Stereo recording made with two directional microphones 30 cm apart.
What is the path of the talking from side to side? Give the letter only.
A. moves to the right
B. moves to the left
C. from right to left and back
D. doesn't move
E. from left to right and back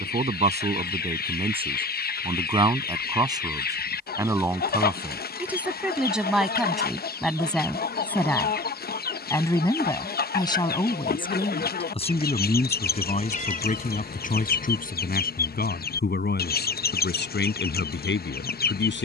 B.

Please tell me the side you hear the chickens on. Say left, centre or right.
left.